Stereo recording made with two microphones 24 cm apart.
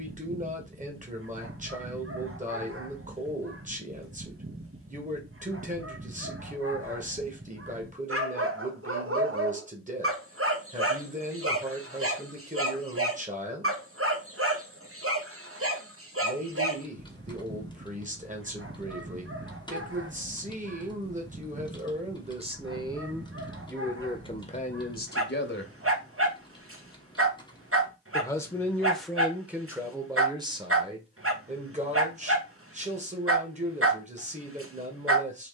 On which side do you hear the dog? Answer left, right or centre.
right.